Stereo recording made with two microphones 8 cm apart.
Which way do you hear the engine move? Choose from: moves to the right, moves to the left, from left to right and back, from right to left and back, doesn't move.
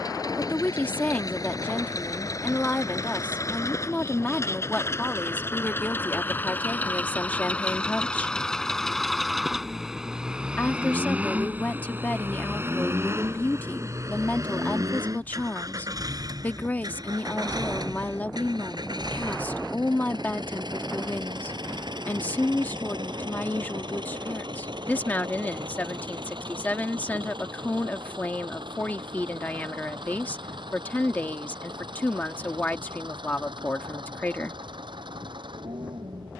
moves to the right.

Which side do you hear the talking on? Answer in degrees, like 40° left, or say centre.
20° left.